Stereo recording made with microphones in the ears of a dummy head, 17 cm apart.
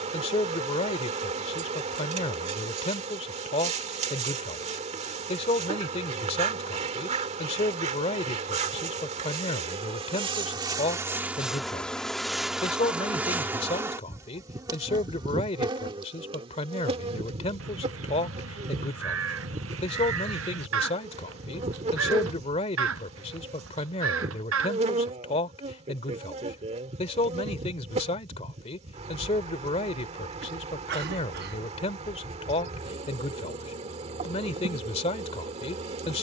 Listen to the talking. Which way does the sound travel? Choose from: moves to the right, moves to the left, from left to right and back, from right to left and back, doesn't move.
doesn't move.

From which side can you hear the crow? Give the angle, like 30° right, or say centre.
80° right.